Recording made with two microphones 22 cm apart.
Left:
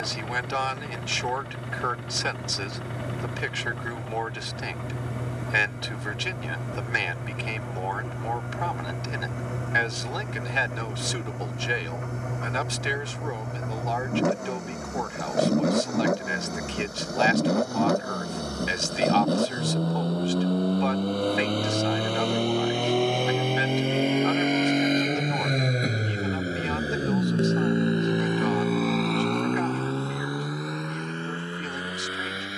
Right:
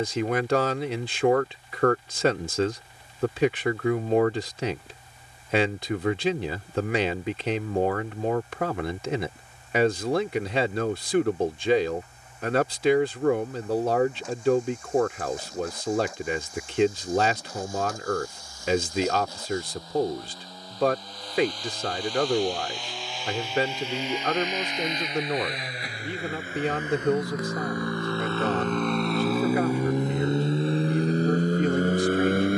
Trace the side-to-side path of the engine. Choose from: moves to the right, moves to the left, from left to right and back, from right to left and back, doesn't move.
moves to the right.